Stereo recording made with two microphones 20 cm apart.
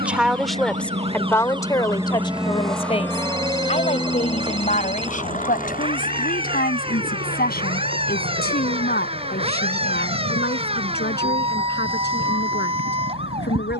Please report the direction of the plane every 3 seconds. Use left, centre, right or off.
right, left, left, left, left.